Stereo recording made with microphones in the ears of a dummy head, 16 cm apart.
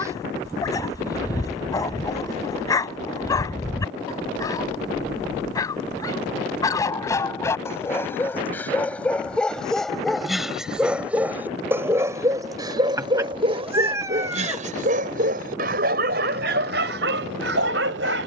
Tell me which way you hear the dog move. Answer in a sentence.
In this clip you hear the dog move from left to right.